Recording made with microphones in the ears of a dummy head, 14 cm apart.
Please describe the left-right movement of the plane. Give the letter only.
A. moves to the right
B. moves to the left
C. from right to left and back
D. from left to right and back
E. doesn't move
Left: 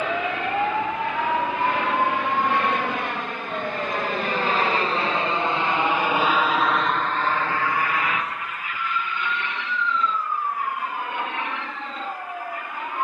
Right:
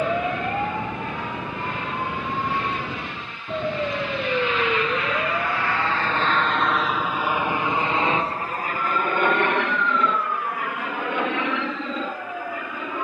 A.